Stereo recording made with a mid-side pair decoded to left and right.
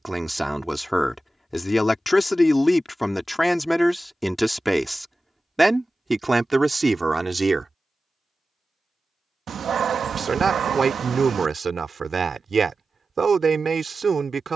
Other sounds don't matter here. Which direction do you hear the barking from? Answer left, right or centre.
right.